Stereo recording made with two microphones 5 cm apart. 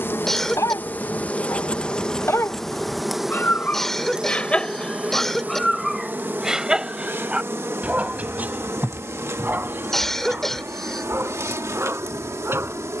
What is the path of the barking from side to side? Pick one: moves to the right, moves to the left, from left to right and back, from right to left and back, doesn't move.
moves to the right.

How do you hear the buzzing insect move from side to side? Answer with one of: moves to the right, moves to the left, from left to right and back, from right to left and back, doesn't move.
moves to the right.